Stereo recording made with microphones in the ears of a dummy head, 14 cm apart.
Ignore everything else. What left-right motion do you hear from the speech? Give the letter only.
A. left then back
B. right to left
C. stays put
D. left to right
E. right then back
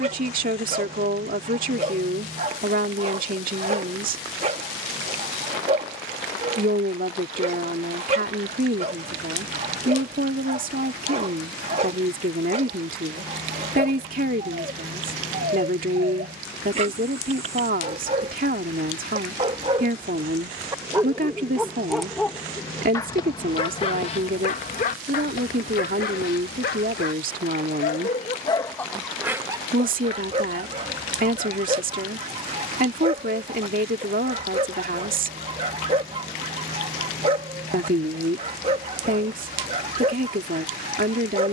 C.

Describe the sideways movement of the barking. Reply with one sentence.
In this clip you hear the barking go left and come back.